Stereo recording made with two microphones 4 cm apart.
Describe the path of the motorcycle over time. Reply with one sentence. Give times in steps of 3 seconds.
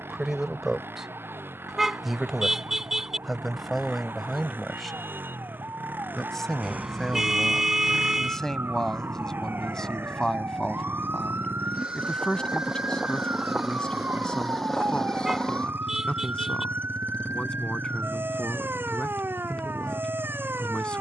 You can hear the motorcycle on the right from 0 s, in the centre from 12 s and on the left from 15 s.